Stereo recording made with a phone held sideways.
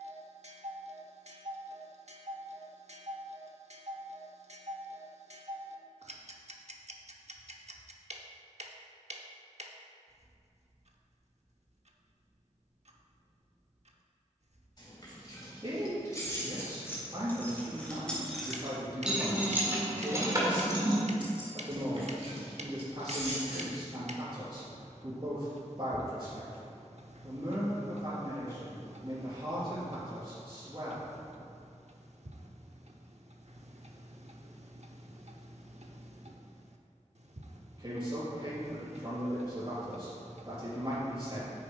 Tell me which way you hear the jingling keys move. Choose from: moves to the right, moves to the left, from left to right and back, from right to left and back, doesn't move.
moves to the right.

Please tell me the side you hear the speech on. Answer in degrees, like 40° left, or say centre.
40° right.